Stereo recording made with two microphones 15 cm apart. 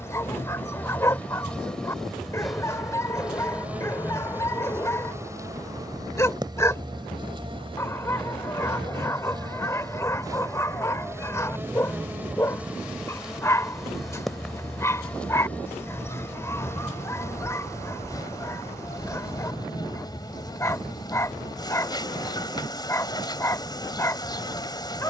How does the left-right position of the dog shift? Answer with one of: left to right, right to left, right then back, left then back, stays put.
stays put.